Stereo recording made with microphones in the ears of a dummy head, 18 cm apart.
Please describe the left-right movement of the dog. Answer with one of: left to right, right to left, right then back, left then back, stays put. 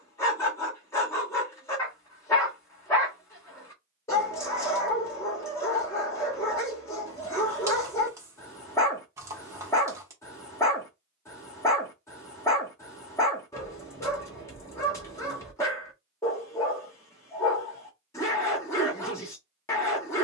stays put.